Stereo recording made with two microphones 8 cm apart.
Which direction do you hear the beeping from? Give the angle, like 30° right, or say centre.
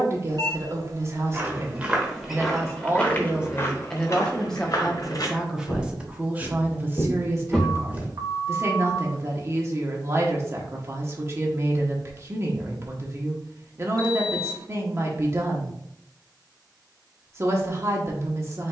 60° right.